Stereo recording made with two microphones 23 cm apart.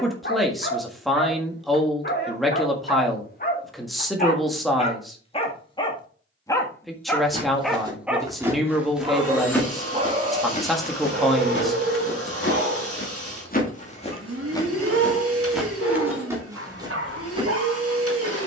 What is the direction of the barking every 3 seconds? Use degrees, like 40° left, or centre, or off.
50° left, 30° left, centre, 30° right, 60° right, 70° right.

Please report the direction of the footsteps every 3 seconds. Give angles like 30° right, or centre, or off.
off, off, 20° right, 30° left, 40° left, 10° right.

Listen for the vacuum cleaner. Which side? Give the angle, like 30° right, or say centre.
70° right.